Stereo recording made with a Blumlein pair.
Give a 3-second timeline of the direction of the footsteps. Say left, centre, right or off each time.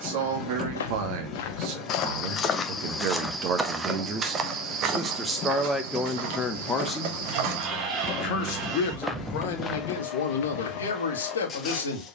left, right, right, left.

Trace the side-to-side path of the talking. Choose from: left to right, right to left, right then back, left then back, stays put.
right to left.